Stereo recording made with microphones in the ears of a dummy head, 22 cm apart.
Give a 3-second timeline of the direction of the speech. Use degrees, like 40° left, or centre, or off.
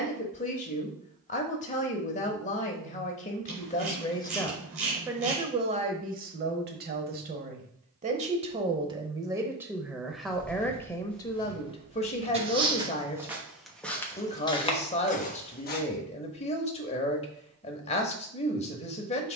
30° left, 10° left, 30° right, centre, 30° left, 30° left, 30° left.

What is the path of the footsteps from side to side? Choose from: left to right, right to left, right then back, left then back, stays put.
right then back.